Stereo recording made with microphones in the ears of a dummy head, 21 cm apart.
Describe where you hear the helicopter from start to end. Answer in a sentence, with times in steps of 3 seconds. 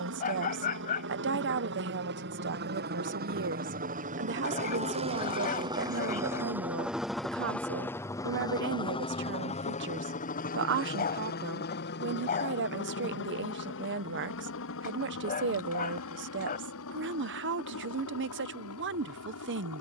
You can hear the helicopter on the right from 0 s, in the centre from 6 s and on the left from 9 s.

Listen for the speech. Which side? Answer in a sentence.
In this clip you hear the speech on the right.